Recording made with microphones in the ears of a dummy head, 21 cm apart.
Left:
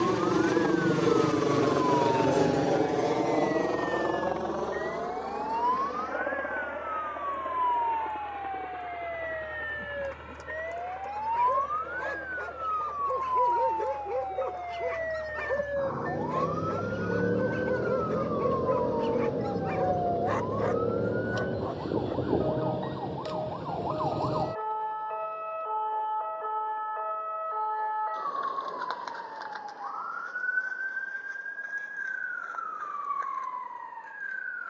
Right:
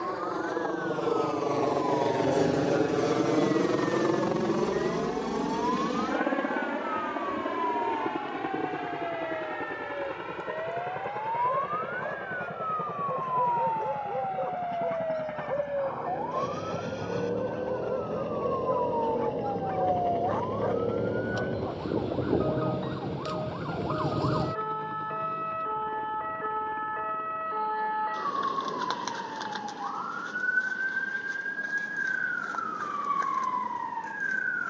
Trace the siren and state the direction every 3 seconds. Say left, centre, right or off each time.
off, left, left, left, left, left, centre, centre, right, right, right, right.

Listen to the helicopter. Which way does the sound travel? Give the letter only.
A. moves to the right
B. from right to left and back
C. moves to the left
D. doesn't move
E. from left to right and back
A.